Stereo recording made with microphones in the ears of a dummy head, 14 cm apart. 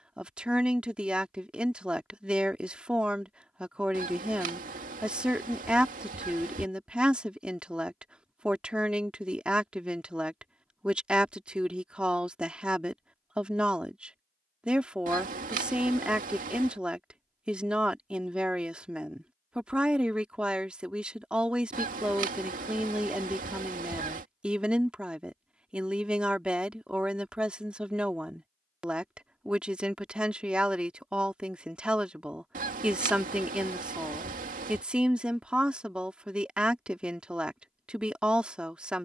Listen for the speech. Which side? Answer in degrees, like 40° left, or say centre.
10° right.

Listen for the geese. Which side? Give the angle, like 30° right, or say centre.
60° right.